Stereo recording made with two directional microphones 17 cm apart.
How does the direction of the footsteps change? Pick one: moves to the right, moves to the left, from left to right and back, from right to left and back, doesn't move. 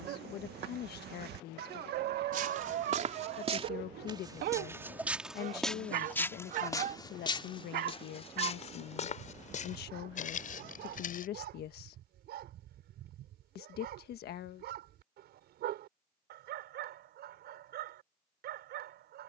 moves to the left.